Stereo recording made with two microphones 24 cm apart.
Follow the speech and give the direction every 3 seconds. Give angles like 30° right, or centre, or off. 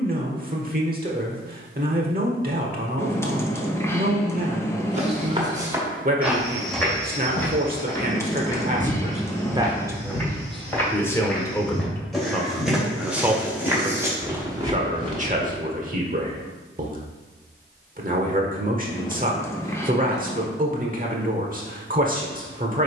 40° right, 40° right, 40° right, centre, 10° right, 40° right, 40° right, 40° right.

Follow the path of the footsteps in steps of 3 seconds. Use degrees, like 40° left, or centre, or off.
off, 20° right, 10° left, 10° left, 10° right, 20° right, off, off.